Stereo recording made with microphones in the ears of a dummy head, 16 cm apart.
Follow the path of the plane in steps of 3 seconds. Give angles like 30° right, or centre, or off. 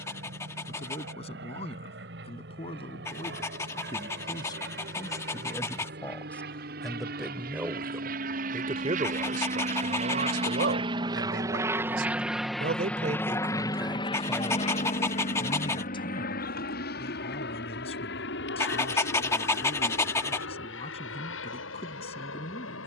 70° right, 70° right, 60° right, 30° right, 20° left, 50° left, 60° left, 70° left.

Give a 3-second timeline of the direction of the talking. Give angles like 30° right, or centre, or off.
30° left, 20° left, 10° right, 60° right, 20° right, 30° left, 30° left, 30° left.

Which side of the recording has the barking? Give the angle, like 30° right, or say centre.
20° left.